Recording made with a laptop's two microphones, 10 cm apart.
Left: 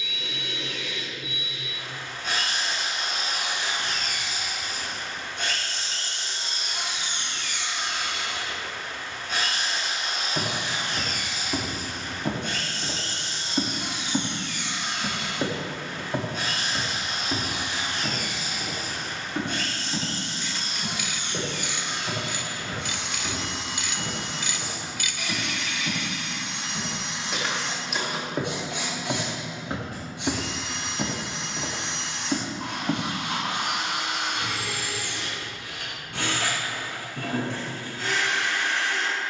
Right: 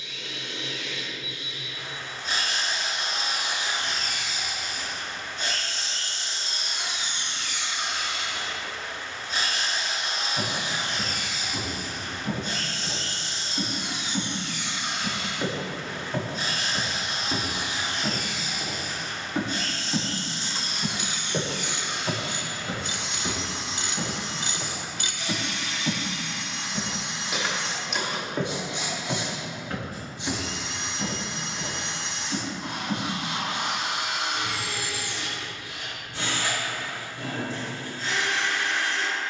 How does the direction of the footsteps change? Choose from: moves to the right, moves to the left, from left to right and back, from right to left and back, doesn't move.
from left to right and back.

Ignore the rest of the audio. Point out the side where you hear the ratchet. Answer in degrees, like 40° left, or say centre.
30° right.